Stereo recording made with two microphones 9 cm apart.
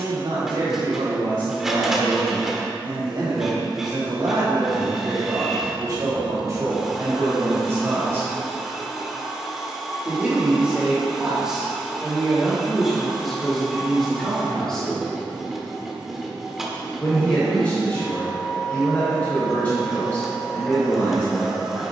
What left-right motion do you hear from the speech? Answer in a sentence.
You can hear the speech move from right to left.